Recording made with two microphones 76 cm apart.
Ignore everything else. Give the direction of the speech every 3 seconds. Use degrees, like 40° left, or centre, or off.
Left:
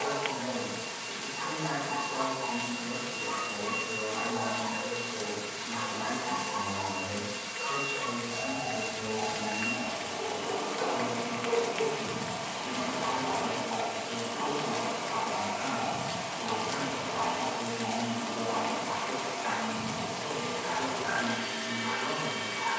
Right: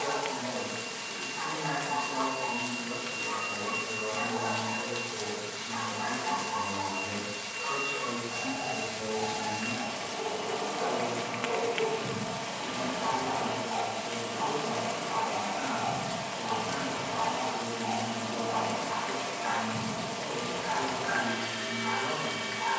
40° left, 30° right, 20° left, 50° left, 50° left, 50° left, 50° left, 50° left.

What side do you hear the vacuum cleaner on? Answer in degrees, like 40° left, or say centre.
60° right.